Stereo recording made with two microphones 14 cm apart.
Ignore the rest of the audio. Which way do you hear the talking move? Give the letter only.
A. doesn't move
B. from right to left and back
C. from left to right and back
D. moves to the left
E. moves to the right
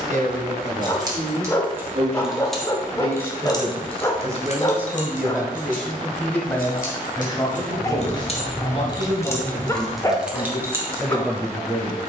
D.